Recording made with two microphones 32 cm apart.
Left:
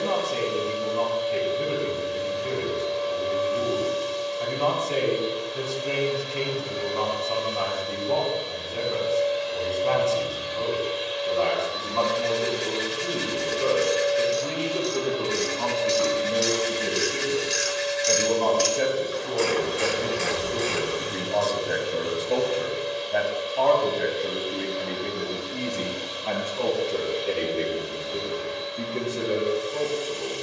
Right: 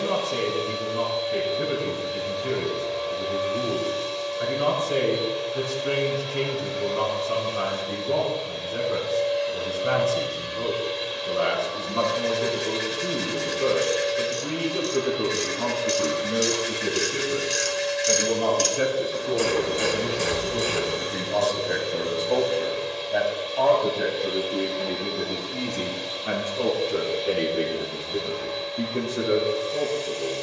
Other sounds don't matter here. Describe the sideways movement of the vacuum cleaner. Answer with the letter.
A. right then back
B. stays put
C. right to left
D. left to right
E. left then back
A.